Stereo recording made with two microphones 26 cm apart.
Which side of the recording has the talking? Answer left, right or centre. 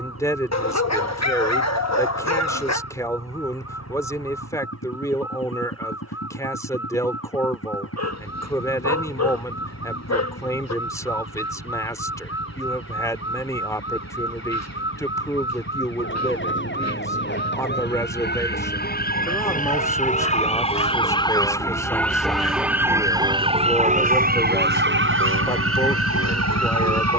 centre.